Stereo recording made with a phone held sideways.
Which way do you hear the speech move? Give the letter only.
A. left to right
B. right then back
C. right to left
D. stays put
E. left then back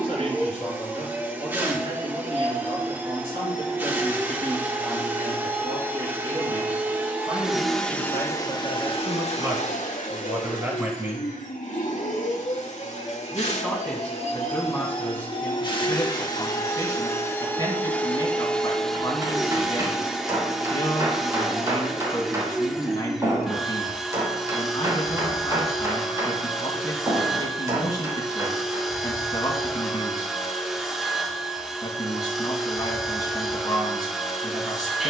C.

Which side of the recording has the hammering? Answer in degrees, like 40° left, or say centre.
30° right.